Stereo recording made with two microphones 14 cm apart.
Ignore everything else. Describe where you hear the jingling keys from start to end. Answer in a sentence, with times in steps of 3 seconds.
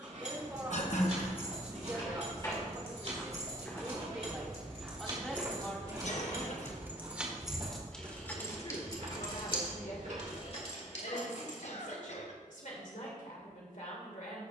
In this clip you hear the jingling keys on the right from 0 s, in the centre from 6 s, on the left from 9 s and not at all from 12 s.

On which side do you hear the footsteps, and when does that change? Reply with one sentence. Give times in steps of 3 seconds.
In this clip you hear the footsteps on the left from 0 s, in the centre from 3 s, on the right from 6 s and not at all from 12 s.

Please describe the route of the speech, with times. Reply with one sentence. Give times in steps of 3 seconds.
In this clip you hear the speech on the right from 0 s, in the centre from 3 s and on the left from 6 s.